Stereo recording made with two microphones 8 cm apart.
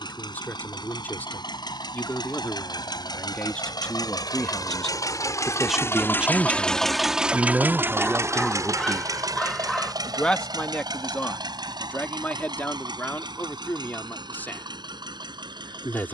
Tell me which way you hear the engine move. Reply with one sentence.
You can hear the engine travel towards the right.